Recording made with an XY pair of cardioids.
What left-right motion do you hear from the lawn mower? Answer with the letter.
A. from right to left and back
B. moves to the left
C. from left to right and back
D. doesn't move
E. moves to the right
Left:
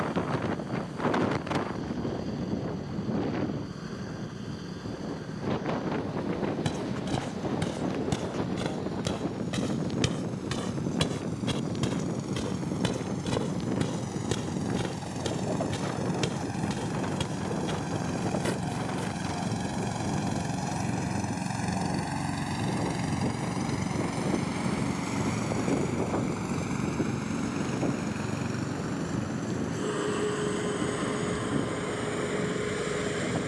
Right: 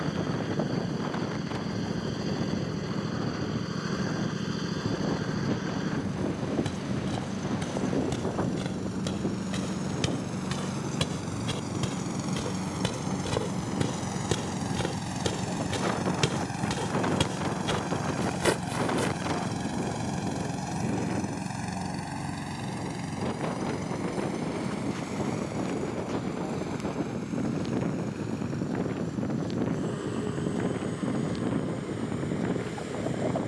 B.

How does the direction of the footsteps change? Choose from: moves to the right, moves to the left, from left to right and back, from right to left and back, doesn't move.
moves to the right.